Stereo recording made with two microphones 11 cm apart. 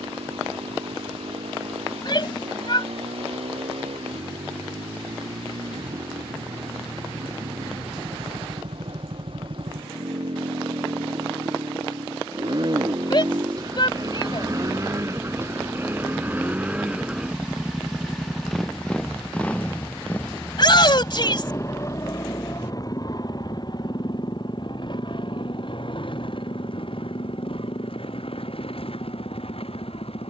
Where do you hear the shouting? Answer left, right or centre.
left.